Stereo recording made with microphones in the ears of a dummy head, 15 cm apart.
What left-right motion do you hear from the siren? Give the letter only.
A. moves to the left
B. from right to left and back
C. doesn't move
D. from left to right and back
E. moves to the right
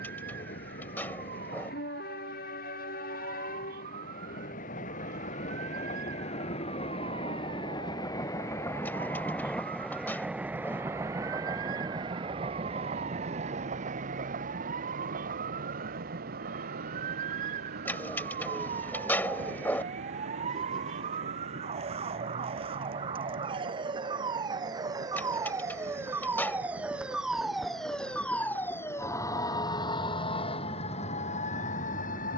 A.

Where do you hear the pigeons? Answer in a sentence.
You can hear the pigeons in the centre.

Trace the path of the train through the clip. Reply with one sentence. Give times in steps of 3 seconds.
You can hear the train on the left from 0 s, in the centre from 9 s, on the right from 12 s and not at all from 30 s.